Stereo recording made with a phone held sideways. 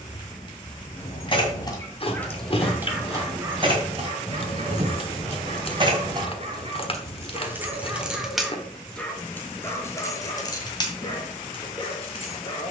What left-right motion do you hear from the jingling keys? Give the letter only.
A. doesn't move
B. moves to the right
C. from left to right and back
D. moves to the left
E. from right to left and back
C.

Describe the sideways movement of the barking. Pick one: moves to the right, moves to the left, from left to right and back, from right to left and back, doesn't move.
from left to right and back.